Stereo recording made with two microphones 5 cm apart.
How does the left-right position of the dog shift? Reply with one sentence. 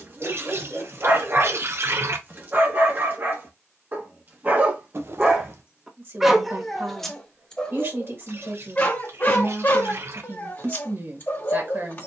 In this clip you hear the dog move from right to left.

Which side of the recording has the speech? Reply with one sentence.
In this clip you hear the speech on the right.